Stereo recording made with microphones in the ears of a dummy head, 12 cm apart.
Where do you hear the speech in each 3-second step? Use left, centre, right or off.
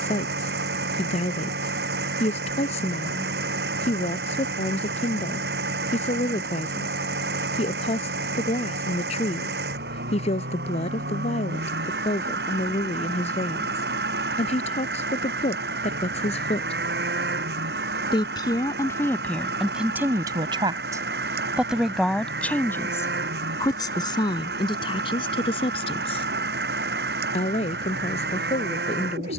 left, left, left, left, left, left, centre, centre, left, left.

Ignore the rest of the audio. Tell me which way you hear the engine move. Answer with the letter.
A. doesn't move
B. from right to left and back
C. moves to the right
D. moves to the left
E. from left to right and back
A.